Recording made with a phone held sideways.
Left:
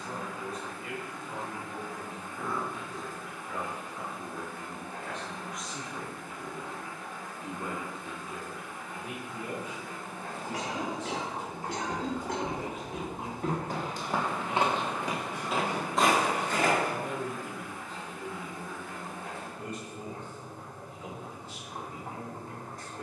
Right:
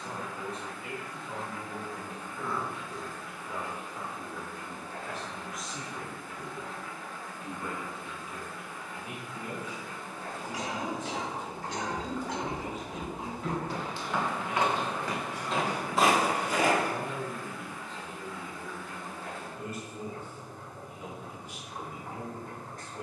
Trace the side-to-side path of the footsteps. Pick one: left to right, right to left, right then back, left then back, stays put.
left then back.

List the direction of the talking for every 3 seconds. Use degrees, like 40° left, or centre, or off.
30° right, 10° right, 20° left, 60° left, 50° left, 20° left, centre, 20° right.